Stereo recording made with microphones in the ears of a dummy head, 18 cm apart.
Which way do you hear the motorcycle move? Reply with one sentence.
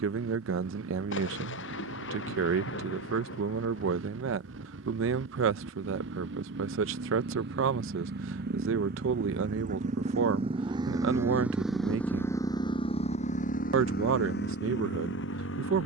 In this clip you hear the motorcycle go from the right side to the left.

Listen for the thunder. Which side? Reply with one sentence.
In this clip you hear the thunder on the left.